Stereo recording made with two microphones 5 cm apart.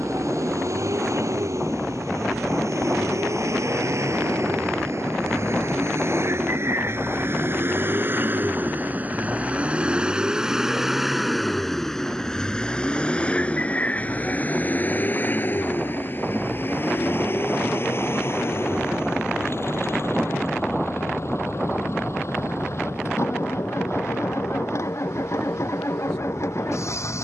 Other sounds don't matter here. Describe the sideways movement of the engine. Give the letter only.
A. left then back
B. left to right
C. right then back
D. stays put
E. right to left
E.